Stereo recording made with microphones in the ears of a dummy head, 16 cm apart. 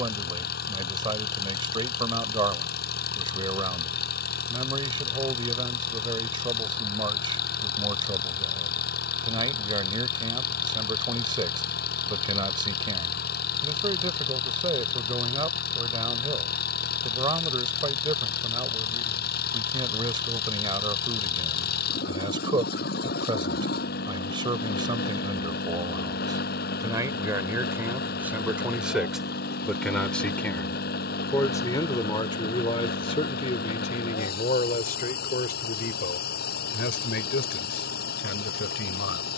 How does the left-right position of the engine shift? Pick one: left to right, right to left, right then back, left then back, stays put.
stays put.